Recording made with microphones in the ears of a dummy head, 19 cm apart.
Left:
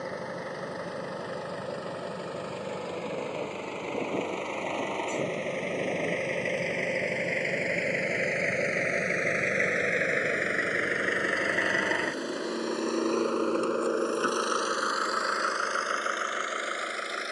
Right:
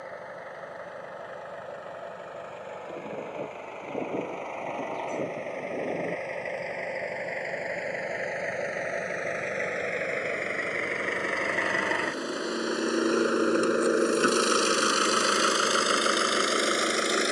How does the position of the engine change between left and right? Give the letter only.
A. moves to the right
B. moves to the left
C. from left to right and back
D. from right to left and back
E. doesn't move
A.